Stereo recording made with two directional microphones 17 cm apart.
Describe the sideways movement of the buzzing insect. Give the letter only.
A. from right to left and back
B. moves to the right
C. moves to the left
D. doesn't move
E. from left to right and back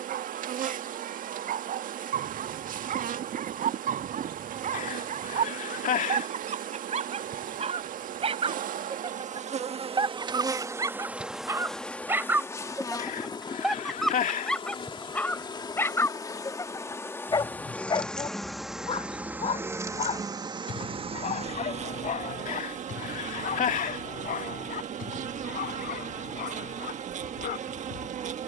A.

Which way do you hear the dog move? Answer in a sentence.
In this clip you hear the dog travel towards the left.